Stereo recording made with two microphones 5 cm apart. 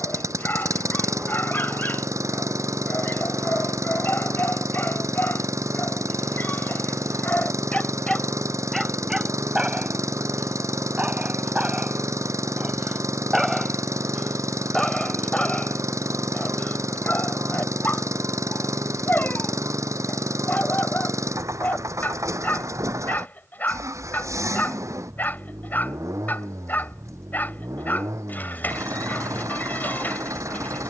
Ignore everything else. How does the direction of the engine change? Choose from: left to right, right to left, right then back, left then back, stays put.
stays put.